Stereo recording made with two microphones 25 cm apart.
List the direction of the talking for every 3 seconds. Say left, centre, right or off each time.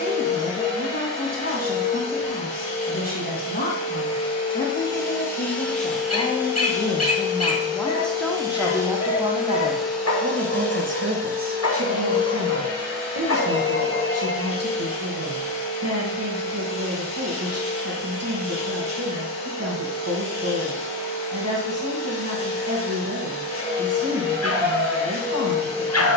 left, left, centre, right, right, right, right, right, right.